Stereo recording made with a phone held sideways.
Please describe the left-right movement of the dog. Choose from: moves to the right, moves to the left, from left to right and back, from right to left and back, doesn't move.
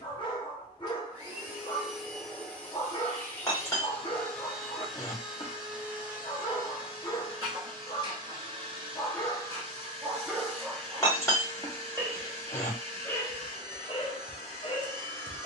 from left to right and back.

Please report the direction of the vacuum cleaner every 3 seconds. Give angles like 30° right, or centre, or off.
10° right, centre, 20° right, 40° right, 40° right.